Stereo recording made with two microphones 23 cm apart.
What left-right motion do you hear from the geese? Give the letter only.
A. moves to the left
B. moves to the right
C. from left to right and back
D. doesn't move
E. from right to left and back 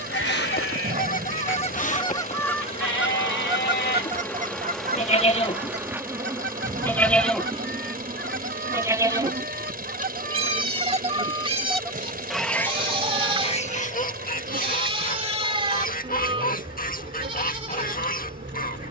C.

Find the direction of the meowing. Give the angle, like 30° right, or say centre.
40° right.